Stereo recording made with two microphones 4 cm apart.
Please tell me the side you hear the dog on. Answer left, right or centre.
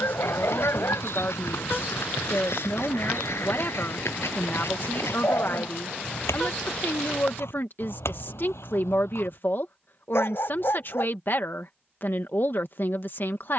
left.